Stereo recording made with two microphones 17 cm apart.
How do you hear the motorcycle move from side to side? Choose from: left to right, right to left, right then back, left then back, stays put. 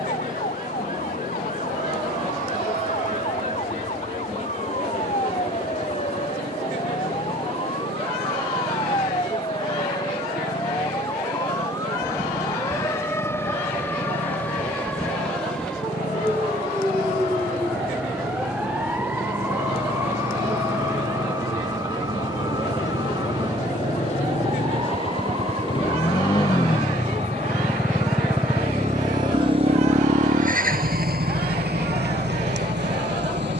left to right.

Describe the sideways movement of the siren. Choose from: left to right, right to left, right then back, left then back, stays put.
left to right.